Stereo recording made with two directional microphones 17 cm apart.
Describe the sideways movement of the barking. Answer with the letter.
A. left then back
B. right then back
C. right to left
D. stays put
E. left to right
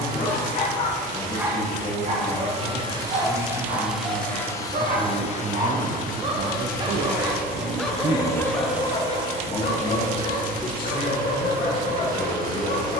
B.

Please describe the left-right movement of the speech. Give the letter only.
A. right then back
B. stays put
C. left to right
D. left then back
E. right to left
A.